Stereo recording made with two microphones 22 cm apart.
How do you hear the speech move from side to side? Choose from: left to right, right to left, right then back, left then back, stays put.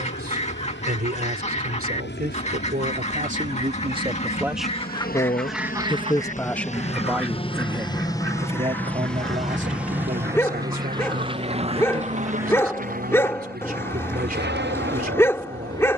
left then back.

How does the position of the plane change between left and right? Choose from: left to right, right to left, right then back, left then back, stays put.
left to right.